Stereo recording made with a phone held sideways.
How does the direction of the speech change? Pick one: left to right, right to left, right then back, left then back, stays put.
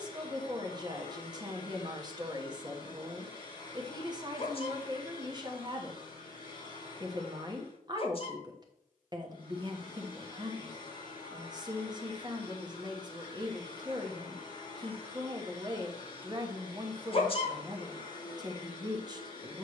stays put.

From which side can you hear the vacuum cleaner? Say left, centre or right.
left.